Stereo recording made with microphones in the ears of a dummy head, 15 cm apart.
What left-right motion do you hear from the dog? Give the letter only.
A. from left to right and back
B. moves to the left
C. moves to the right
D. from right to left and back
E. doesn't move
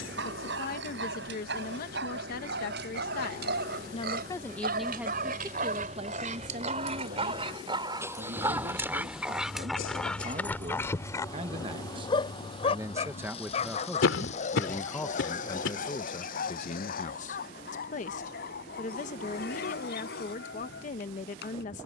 B.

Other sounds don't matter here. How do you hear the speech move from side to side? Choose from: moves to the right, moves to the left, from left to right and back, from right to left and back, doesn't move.
from left to right and back.